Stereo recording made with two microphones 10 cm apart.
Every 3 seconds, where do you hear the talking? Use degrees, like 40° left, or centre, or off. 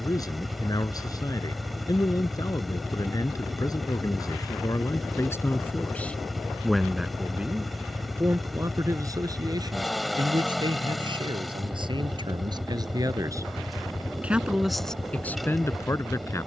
40° left, 30° left, 10° right, 50° right, 30° right, 20° left.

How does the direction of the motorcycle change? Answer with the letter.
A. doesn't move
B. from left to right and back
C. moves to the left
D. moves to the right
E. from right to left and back
A.